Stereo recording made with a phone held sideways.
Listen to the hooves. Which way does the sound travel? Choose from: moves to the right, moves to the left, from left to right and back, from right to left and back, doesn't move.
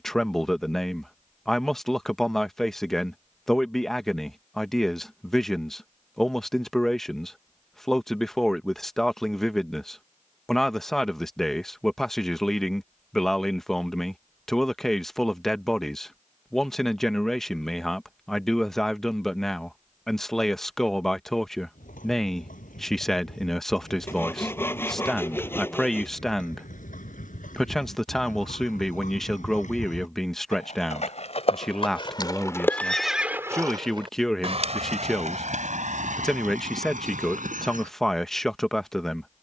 moves to the right.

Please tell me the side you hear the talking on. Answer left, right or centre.
centre.